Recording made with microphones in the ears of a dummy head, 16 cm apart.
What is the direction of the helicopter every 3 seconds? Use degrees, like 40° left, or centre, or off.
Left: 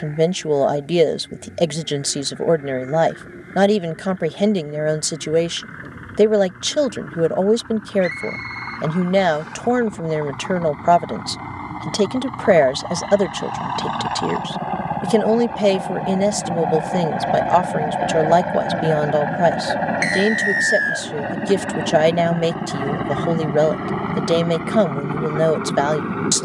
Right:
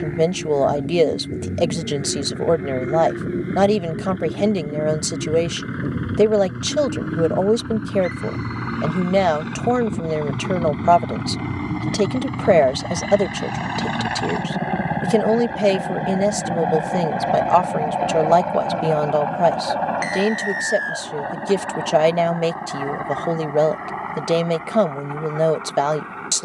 60° right, 60° right, 50° right, 40° right, 30° right, 10° right, 20° left, 40° left, 50° left.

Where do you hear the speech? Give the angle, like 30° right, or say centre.
10° left.